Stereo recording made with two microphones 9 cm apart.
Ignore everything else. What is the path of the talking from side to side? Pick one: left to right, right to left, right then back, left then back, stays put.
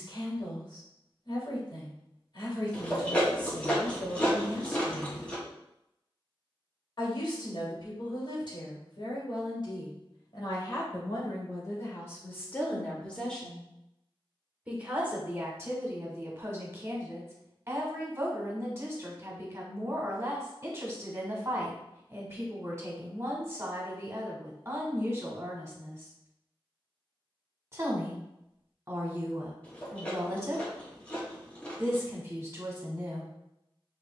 left to right.